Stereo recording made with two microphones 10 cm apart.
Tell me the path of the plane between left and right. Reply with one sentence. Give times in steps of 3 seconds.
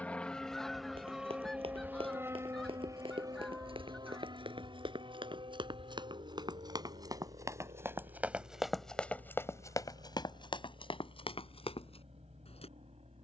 In this clip you hear the plane in the centre from 0 s and on the right from 3 s.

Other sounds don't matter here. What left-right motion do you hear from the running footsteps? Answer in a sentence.
You can hear the running footsteps travel towards the left.